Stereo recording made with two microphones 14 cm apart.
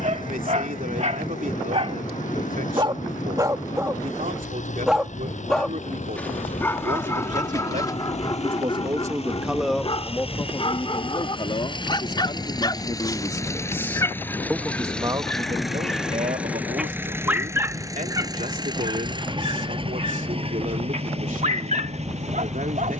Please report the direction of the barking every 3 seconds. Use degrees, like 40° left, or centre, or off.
50° right, 10° right, 20° left, 40° left, 30° left, centre, 40° right, 60° right.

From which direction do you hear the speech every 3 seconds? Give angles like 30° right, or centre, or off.
70° right, 70° right, 60° right, 20° left, 20° left, 60° right, 70° right, 70° right.